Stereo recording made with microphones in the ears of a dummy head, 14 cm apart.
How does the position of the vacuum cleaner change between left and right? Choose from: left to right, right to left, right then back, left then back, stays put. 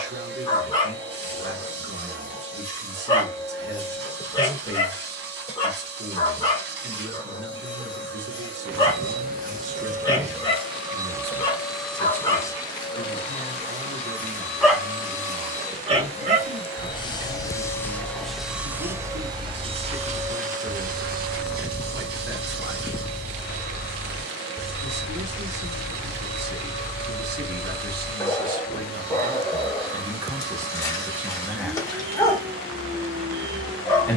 left then back.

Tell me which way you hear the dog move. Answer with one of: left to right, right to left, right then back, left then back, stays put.
right then back.